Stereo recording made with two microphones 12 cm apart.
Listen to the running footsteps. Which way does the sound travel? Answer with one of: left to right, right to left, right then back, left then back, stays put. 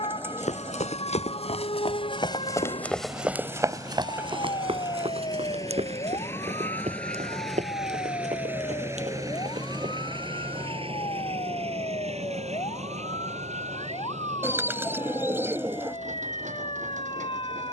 left to right.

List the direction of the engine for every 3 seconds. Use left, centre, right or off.
left, left, centre, right, right, right.